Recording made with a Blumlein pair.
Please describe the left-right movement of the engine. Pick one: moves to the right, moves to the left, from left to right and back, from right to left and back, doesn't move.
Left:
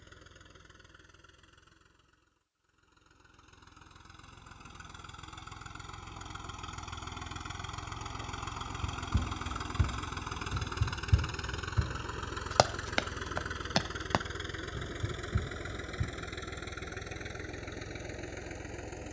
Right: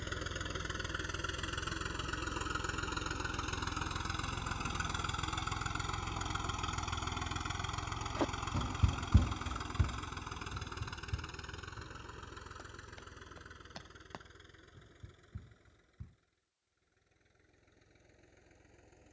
moves to the left.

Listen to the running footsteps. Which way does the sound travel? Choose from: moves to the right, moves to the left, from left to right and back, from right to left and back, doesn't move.
moves to the left.